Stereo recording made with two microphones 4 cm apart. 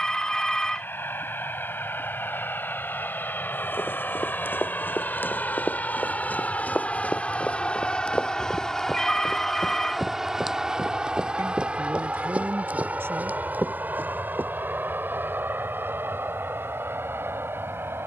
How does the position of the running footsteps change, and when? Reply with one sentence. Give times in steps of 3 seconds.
You can hear the running footsteps not at all from 0 s, on the left from 3 s, in the centre from 9 s, on the right from 12 s and not at all from 15 s.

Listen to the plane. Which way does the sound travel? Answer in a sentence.
In this clip you hear the plane go from the left side to the right.